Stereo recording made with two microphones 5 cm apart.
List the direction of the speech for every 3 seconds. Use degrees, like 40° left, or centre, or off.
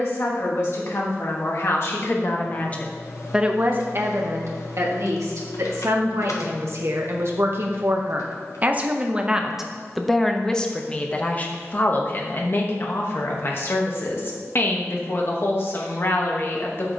50° left, 50° right, 50° right, 10° left, 50° left, 50° left.